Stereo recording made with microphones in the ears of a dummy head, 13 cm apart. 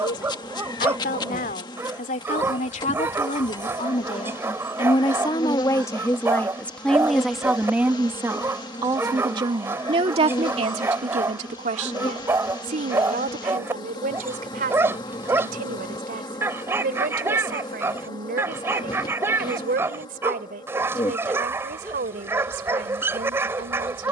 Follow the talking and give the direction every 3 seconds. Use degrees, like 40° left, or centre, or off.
60° left, 40° left, centre, 40° right, 60° right, 70° right, 70° right, 70° right.